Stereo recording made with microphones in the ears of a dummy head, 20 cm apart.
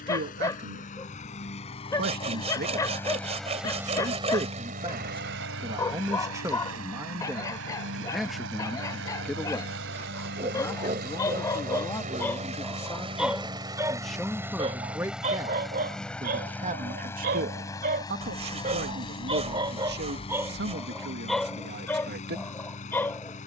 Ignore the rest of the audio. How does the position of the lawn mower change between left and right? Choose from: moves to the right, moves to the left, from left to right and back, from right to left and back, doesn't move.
from left to right and back.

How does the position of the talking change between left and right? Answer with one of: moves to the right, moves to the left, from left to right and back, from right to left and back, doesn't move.
from right to left and back.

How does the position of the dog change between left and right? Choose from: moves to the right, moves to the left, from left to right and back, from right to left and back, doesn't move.
from left to right and back.